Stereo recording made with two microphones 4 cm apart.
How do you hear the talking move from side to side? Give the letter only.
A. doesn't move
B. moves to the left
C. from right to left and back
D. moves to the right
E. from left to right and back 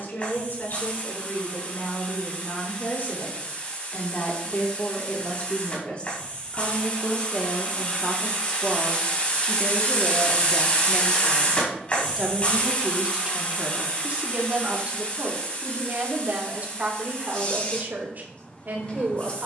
D.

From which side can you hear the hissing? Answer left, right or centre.
left.